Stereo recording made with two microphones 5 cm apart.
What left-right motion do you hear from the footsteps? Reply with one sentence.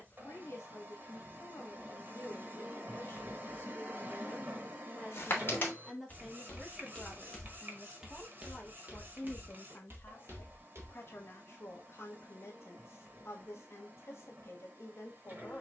You can hear the footsteps go from the left side to the right.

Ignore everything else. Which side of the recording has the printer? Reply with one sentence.
You can hear the printer on the right.